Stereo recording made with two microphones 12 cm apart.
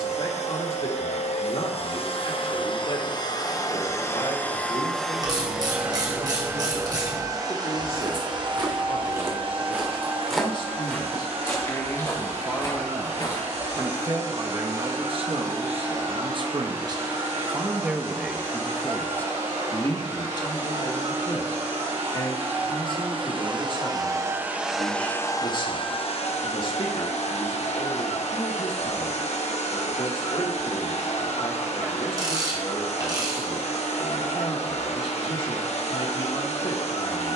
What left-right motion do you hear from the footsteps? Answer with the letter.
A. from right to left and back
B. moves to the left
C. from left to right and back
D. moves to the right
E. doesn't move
B.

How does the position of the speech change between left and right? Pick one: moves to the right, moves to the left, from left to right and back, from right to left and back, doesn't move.
from left to right and back.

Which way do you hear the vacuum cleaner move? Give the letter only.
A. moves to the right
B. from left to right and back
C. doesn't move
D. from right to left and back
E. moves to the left
B.